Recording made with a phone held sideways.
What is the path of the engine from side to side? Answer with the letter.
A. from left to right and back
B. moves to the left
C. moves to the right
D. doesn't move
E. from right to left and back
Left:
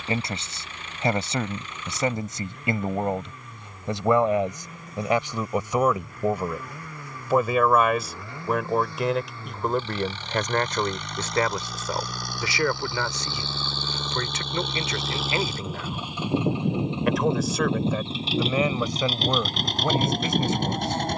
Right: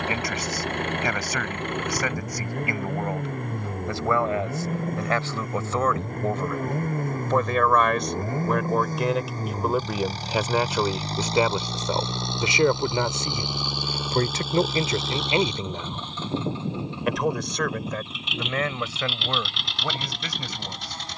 B.